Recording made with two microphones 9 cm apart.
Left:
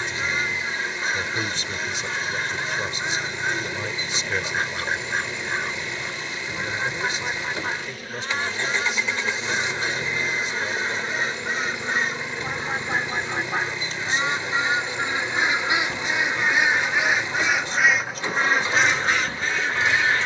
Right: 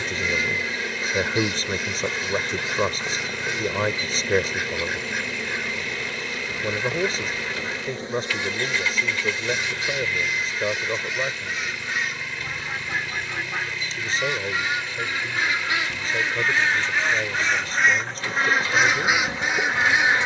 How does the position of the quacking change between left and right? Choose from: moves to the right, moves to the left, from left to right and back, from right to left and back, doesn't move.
moves to the right.